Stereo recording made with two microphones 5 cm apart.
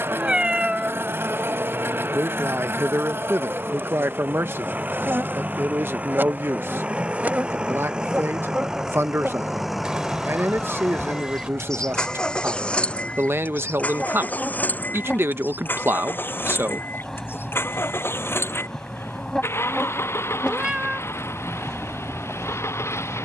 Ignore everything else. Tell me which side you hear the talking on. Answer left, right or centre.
right.